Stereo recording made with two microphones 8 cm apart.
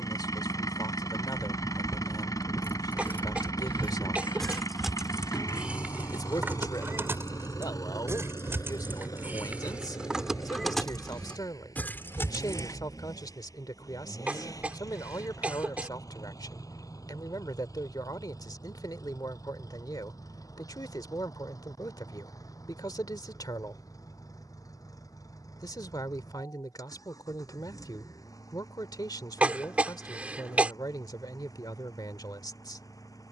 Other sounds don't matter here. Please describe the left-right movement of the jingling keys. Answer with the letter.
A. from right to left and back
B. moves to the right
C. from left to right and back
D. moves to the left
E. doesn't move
C.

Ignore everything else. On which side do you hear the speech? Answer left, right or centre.
left.